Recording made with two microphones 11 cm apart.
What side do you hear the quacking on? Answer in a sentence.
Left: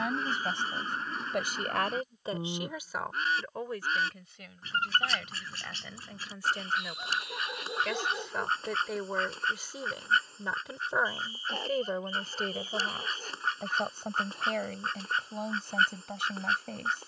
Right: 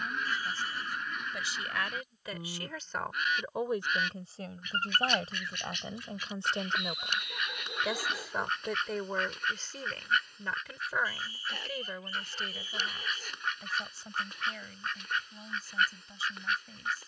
You can hear the quacking on the left.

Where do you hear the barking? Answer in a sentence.
You can hear the barking on the left.